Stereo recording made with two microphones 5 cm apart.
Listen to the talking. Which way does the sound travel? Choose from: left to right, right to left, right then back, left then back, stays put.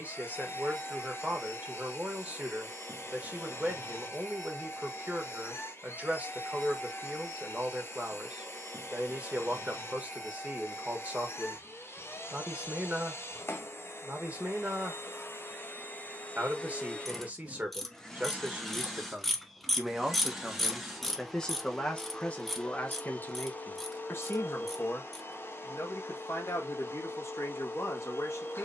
right to left.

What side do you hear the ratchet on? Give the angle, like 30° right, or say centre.
centre.